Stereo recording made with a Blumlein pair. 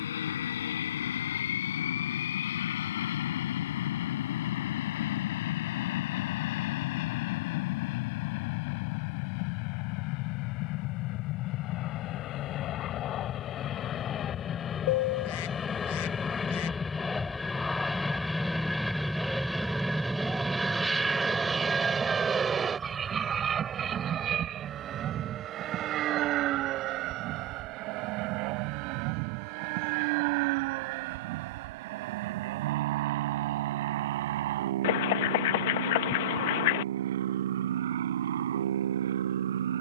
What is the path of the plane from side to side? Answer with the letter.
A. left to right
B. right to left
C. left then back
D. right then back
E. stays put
A.